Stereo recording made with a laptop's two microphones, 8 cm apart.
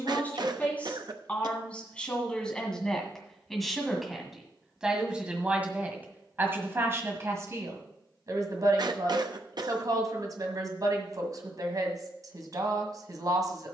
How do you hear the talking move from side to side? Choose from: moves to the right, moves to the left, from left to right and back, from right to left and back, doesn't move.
moves to the right.